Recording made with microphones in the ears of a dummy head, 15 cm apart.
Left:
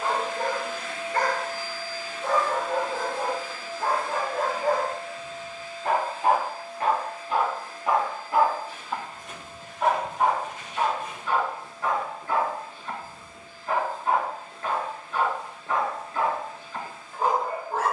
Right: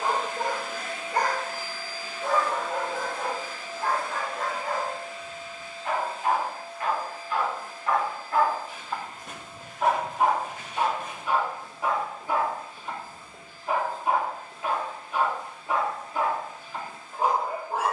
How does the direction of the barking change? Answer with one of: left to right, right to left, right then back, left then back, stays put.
left then back.